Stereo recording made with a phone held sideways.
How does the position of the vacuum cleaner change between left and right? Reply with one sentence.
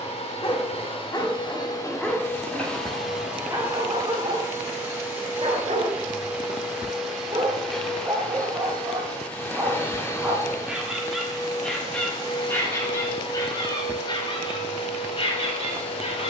In this clip you hear the vacuum cleaner move from left to right and back again.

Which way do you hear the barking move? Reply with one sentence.
You can hear the barking go right and come back.